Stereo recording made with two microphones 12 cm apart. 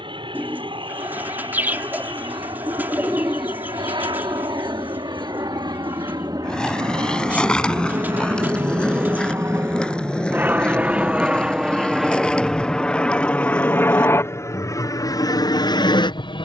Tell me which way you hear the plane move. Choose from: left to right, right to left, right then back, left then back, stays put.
right to left.